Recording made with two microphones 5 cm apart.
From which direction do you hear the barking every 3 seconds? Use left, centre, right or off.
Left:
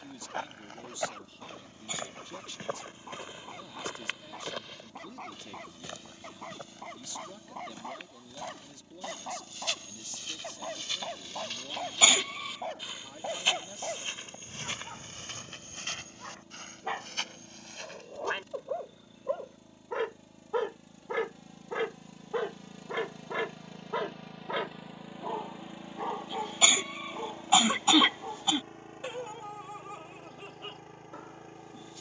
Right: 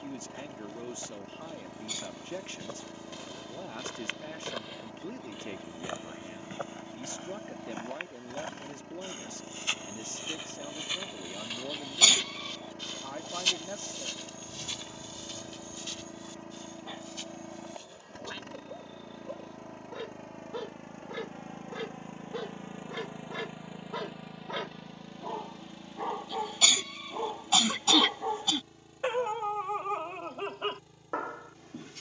left, left, left, left, left, left, left, left, centre, right, right.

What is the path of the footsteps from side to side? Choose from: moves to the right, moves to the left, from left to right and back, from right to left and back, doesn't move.
from left to right and back.